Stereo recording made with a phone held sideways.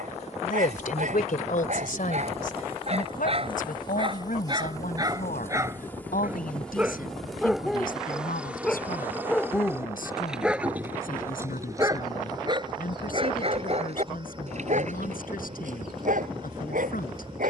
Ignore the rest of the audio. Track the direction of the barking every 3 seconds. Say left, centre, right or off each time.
right, right, centre, centre, right, right.